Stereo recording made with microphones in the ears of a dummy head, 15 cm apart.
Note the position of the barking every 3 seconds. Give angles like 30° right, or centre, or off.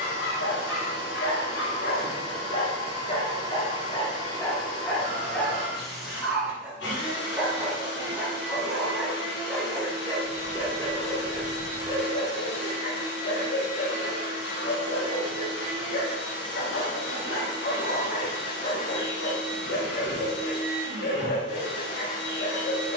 70° left, 20° left, 10° right, 10° left, 50° left, 50° left, 50° left, 50° left.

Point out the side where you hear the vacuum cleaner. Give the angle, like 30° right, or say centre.
90° left.